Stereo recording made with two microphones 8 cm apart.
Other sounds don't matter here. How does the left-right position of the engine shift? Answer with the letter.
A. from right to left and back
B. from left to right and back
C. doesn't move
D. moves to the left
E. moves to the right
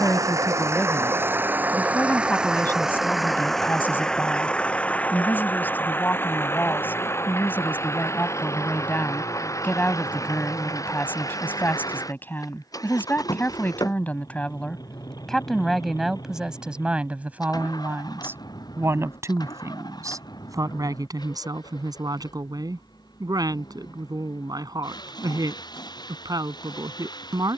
D.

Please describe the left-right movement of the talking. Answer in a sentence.
In this clip you hear the talking travel towards the right.